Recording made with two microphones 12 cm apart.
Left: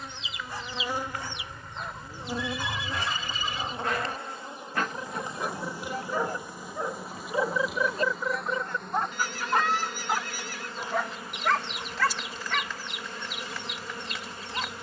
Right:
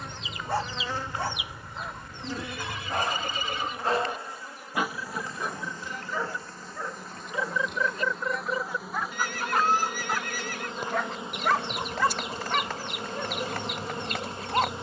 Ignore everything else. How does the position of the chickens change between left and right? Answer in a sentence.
You can hear the chickens move from right to left and back again.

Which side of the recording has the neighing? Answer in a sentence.
In this clip you hear the neighing on the right.